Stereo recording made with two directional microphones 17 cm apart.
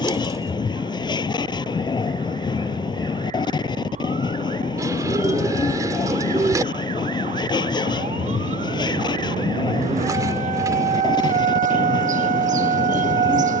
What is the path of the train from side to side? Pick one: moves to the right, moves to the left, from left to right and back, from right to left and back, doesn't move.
doesn't move.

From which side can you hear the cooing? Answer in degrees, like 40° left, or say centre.
20° right.